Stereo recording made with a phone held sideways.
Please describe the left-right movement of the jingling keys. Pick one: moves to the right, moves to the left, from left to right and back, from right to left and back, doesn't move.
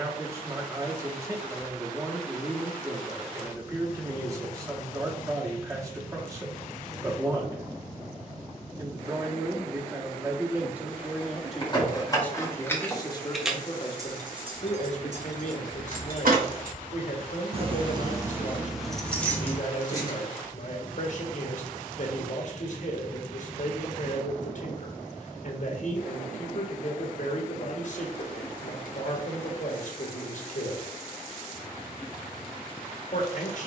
from left to right and back.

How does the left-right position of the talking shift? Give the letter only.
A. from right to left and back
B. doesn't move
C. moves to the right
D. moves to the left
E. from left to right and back
D.